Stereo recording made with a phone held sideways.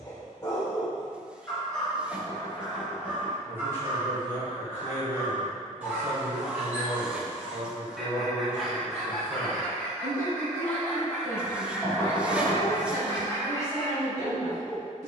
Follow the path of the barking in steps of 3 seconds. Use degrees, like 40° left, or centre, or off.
10° left, 20° right, 10° right, 10° left, 20° left.